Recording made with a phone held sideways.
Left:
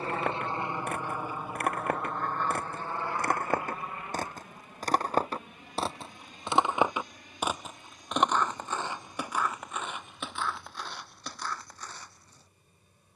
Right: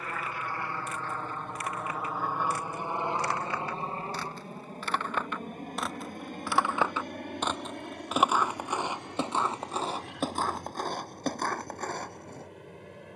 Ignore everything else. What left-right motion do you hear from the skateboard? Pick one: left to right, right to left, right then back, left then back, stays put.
left to right.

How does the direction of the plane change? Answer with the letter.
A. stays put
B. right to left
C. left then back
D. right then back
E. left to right
E.